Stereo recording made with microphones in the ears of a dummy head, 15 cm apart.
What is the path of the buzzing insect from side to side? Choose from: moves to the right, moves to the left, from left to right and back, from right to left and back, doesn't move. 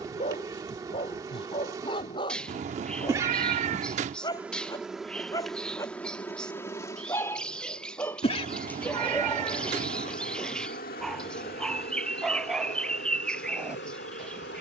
moves to the left.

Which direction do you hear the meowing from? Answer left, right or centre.
right.